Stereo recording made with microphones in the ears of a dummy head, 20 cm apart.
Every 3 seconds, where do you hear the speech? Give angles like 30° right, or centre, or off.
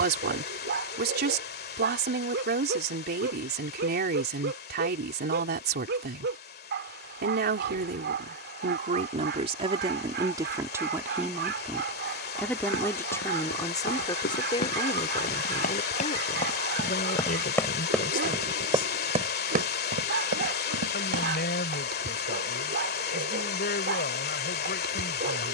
50° right, 50° right, 40° right, 20° right, 20° left, 30° left, 40° left, 40° left, 40° left.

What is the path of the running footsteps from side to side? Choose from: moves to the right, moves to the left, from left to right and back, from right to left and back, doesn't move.
moves to the right.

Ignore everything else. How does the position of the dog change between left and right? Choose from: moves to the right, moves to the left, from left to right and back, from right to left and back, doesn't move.
doesn't move.